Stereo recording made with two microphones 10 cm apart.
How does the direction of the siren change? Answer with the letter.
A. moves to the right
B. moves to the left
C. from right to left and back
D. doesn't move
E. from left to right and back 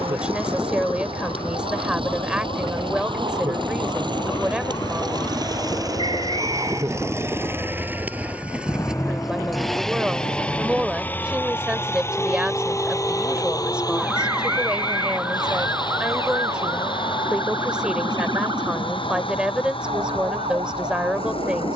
A.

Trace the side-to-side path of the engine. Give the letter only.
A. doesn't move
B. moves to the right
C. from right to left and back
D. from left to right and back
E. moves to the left
E.